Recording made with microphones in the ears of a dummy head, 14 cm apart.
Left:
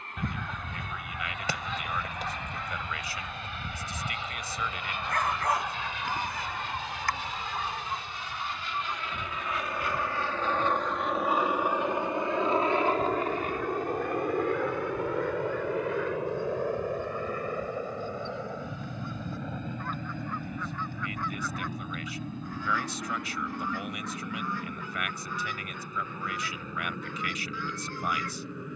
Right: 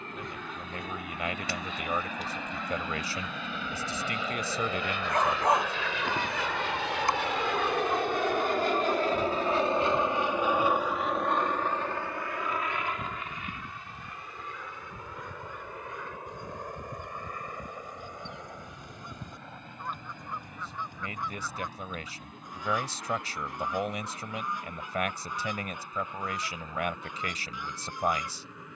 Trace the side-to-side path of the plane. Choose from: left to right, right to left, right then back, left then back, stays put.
right to left.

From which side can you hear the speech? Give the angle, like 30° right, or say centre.
30° right.